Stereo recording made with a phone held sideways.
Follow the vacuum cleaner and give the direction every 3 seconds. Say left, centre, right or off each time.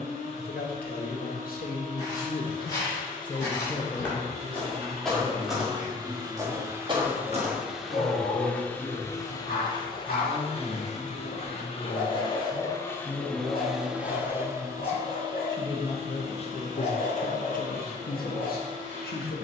right, right, centre, left, centre, right, right.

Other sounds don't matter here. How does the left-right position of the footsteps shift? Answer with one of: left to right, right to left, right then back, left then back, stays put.
left to right.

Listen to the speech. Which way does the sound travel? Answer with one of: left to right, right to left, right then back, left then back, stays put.
right then back.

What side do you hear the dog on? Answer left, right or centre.
left.